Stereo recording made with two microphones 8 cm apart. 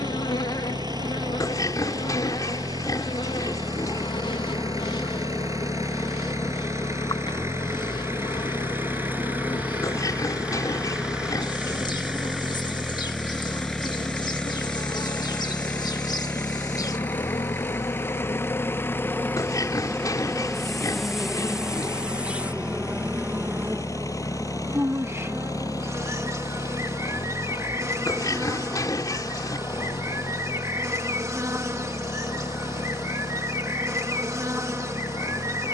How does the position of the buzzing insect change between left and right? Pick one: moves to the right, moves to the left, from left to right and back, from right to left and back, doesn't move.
moves to the right.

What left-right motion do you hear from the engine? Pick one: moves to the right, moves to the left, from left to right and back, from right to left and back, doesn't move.
moves to the left.